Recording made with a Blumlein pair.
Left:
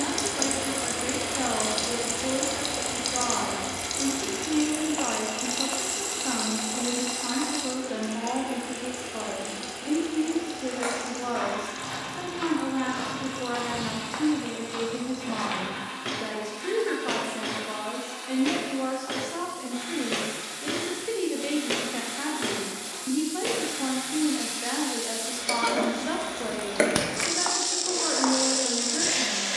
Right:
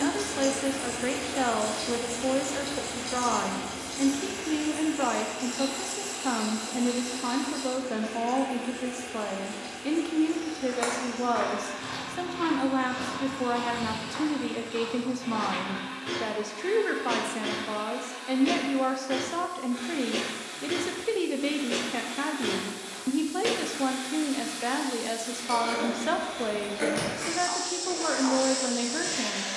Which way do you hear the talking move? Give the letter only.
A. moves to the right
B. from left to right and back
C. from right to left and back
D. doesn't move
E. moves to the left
D.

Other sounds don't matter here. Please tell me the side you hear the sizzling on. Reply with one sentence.
You can hear the sizzling on the left.